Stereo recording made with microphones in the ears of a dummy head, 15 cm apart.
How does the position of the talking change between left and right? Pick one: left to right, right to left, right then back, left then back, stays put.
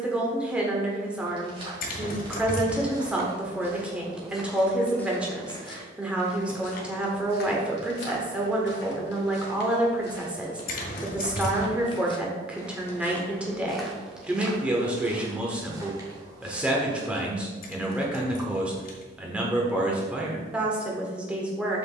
stays put.